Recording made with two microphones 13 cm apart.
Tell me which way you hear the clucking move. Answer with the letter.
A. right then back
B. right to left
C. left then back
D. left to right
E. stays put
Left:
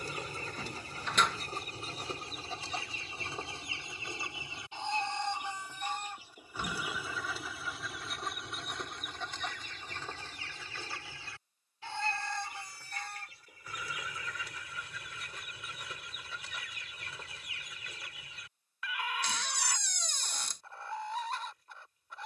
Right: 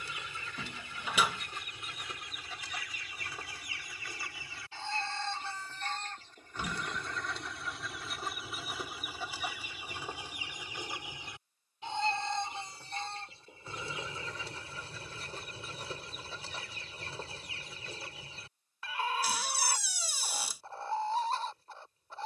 D.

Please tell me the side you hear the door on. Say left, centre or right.
centre.